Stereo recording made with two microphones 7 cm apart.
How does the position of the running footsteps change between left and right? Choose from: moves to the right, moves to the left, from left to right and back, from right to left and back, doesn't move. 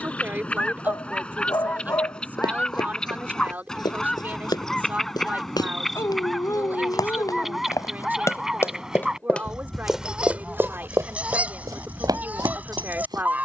moves to the right.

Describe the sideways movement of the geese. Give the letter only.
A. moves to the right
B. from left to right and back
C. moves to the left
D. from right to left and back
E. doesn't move
A.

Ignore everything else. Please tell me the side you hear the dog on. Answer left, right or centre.
left.